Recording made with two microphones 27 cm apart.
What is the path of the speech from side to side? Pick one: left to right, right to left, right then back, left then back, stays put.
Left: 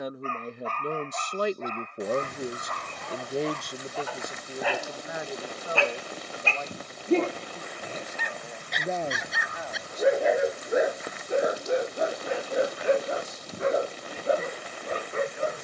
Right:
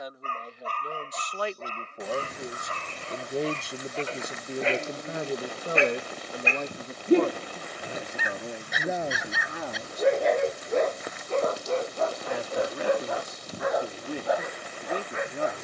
left to right.